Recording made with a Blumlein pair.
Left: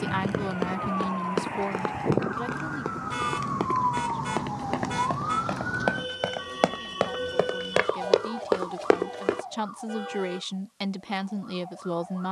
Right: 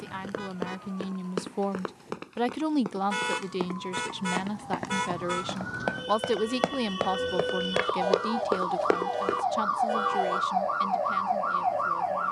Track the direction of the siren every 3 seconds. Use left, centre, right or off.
left, left, centre, right.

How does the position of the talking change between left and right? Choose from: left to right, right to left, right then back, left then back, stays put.
right then back.